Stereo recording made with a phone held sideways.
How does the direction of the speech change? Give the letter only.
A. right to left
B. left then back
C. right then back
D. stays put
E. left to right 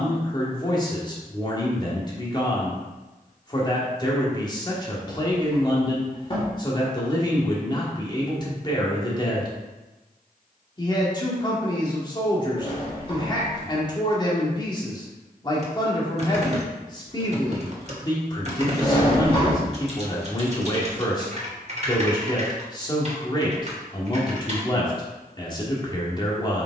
D.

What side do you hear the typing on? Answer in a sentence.
In this clip you hear the typing on the right.